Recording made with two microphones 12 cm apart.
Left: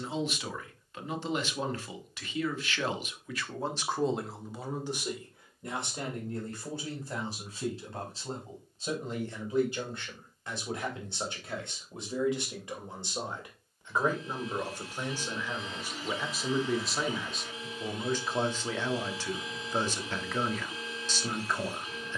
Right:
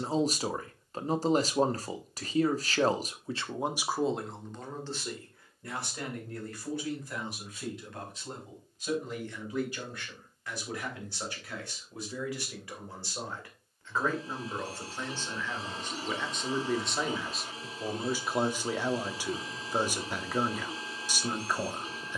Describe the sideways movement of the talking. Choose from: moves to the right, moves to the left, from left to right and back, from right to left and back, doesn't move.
from right to left and back.